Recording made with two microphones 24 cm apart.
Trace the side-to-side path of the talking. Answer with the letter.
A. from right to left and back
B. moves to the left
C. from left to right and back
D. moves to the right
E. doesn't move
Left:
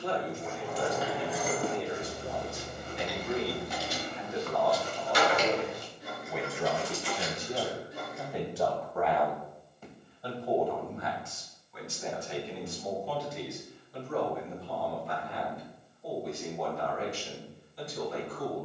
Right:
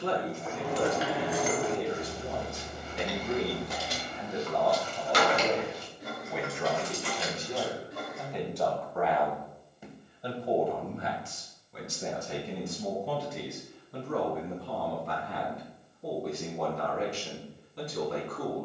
A.